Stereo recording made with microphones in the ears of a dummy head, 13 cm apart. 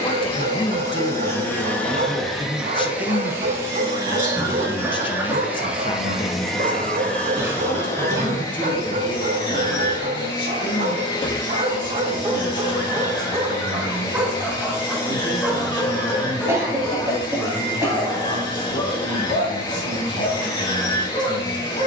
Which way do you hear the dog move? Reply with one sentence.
You can hear the dog move from right to left.